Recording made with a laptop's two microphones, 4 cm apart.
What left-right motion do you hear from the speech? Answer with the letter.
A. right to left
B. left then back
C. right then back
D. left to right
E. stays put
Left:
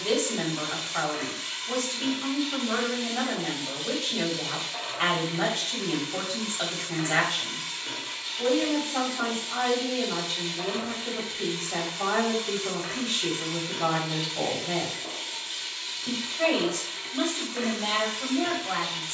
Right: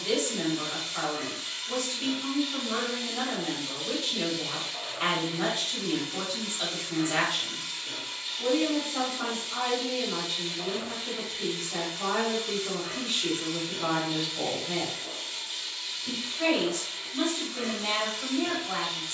E.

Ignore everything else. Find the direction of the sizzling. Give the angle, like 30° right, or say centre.
70° left.